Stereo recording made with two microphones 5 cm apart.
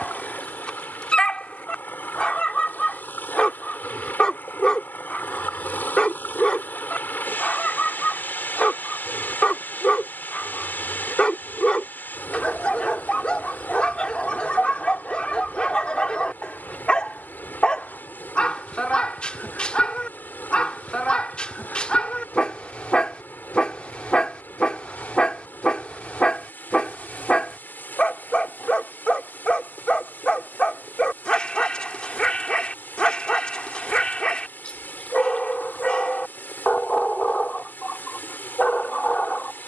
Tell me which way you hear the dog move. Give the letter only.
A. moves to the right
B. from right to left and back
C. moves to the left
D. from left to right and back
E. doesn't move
E.